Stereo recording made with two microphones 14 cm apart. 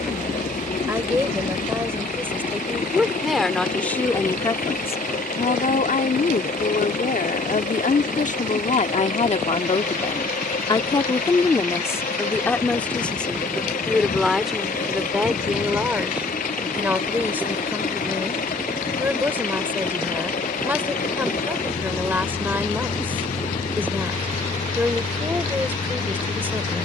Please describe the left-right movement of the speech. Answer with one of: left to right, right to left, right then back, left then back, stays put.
left then back.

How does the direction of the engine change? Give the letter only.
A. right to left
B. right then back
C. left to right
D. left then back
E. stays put
E.